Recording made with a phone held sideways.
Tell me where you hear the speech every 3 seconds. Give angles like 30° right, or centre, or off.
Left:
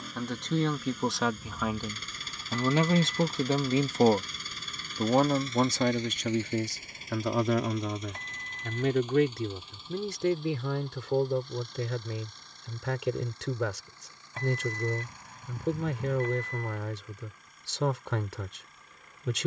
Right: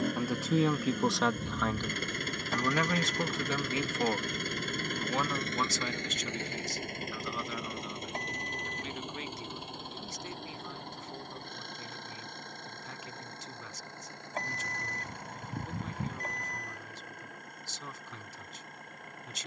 centre, 40° left, 70° left, 80° left, 80° left, 80° left, 80° left.